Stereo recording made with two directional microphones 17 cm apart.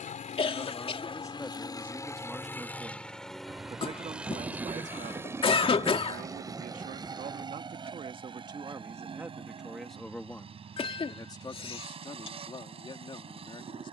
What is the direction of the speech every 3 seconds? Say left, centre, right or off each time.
centre, right, right, centre, left.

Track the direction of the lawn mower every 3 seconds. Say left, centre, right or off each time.
left, centre, right, right, right.